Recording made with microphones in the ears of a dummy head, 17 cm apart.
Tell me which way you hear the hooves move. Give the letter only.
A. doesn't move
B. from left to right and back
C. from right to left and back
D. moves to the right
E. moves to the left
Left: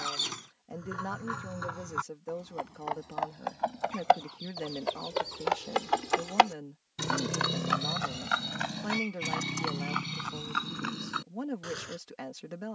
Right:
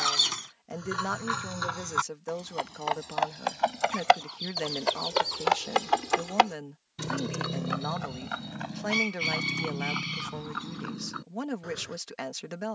E.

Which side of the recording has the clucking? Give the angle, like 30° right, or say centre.
40° right.